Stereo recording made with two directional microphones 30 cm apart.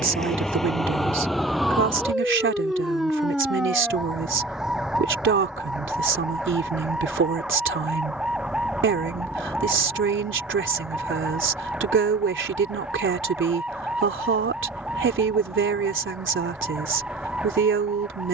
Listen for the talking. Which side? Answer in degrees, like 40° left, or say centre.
40° right.